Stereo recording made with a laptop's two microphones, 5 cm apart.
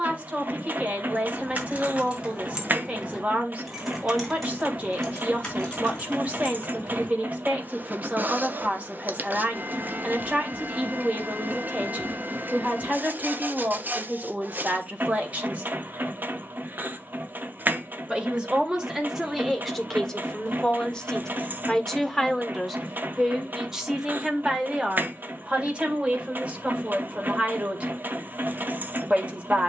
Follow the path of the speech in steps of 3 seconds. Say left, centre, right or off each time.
right, right, right, right, right, right, centre, centre, right, right.